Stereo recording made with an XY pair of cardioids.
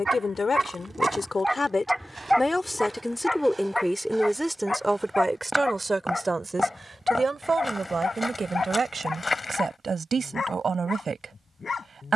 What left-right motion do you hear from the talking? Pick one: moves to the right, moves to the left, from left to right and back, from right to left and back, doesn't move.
moves to the right.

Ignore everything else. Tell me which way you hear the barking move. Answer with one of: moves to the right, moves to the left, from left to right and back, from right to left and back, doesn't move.
moves to the left.